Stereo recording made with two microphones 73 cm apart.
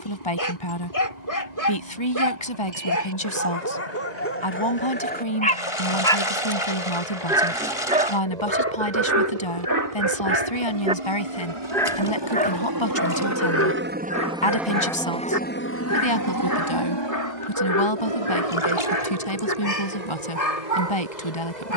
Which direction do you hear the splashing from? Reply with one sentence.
You can hear the splashing on the left.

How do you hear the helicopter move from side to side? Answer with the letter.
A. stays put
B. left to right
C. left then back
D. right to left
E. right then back
D.